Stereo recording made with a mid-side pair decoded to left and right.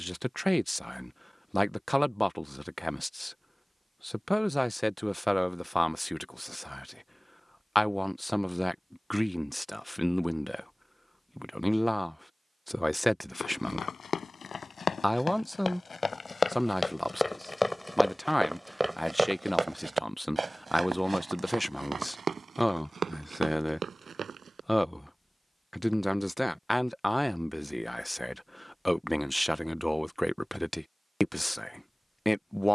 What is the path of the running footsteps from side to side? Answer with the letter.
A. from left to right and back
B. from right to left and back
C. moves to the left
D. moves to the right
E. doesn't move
D.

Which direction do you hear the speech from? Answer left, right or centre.
centre.